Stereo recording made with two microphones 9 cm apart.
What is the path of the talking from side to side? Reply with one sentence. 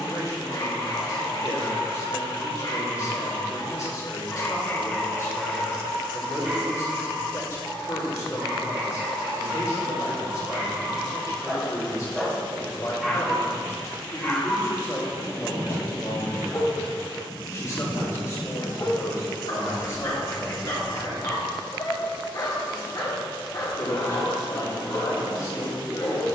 You can hear the talking stay put.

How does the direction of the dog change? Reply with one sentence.
You can hear the dog go right and come back.